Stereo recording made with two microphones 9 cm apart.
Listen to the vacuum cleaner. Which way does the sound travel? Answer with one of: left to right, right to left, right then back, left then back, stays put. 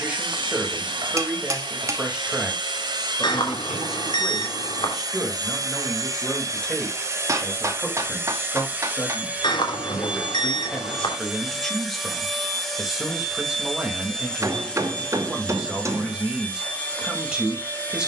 right to left.